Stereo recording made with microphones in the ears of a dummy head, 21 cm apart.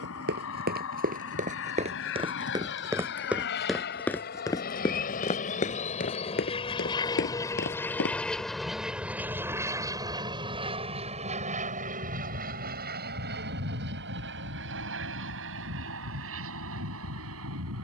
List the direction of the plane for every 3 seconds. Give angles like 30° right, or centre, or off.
60° left, 40° left, 10° left, 20° right, 40° right, 50° right.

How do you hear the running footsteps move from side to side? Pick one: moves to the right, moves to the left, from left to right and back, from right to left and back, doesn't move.
moves to the left.